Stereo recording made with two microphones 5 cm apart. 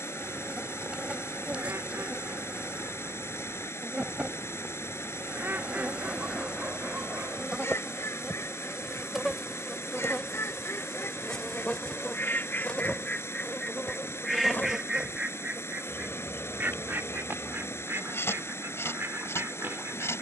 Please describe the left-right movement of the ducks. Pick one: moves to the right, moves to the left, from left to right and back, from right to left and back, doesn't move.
from right to left and back.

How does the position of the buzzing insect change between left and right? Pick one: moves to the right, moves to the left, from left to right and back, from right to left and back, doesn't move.
moves to the left.